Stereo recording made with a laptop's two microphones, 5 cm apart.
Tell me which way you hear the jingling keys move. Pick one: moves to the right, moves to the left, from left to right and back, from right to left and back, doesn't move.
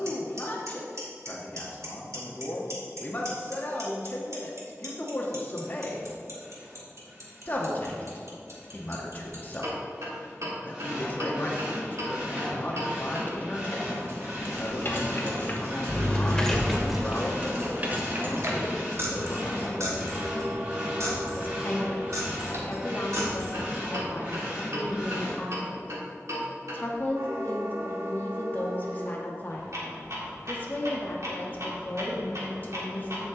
moves to the right.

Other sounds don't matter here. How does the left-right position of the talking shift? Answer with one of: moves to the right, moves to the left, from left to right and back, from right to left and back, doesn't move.
doesn't move.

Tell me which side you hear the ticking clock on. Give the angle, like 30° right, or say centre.
70° right.